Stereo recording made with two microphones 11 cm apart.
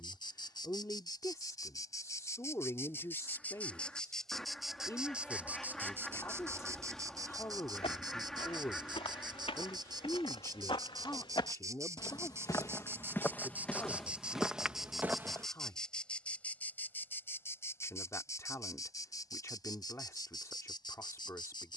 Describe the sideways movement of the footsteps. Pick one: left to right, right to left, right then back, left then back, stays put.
left to right.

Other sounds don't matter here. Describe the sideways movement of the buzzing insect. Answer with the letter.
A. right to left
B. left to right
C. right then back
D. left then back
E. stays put
C.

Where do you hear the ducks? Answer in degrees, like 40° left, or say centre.
centre.